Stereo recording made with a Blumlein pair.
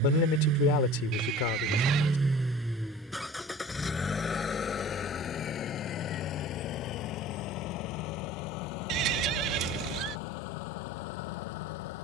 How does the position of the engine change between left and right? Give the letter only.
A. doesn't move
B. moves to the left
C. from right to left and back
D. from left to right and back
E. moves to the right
B.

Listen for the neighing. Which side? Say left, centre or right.
right.